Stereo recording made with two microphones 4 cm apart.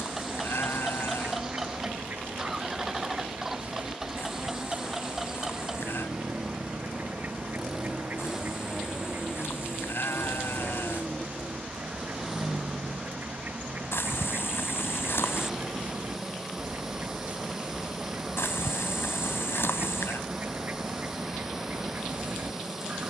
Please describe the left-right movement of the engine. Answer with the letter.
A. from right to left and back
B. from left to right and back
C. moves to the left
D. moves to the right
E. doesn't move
E.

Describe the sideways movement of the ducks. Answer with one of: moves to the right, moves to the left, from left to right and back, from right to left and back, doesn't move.
doesn't move.